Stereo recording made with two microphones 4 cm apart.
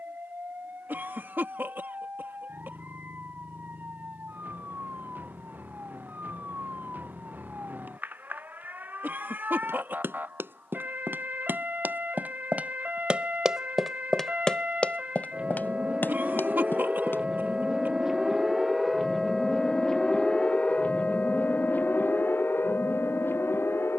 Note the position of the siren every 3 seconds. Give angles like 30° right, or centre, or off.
50° right, 50° right, 50° right, 50° right, 40° right, 20° right, 10° left, 60° left.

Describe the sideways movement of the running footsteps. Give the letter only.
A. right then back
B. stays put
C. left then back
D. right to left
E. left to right
D.